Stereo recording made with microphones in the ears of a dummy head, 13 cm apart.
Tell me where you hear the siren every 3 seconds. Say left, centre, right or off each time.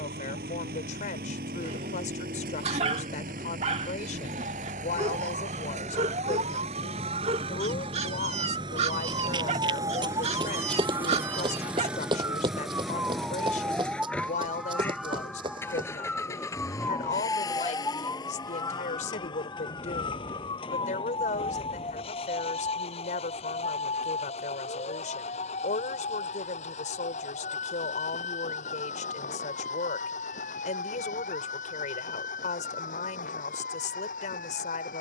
right, right, right, right, centre, centre, left, left, left, left, left, left.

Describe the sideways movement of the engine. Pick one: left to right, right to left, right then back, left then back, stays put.
right to left.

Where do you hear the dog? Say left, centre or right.
right.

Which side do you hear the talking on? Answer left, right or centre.
left.